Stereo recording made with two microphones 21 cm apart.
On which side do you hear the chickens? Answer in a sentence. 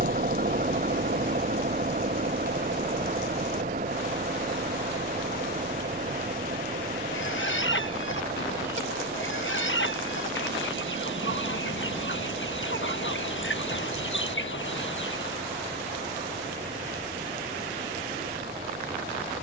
In this clip you hear the chickens on the left.